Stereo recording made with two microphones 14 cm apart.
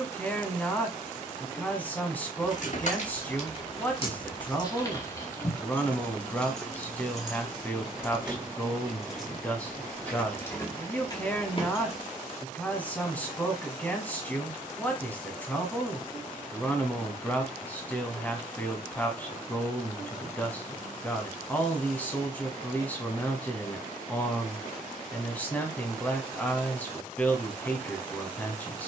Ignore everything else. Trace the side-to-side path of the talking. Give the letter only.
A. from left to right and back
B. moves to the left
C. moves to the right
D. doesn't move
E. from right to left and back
D.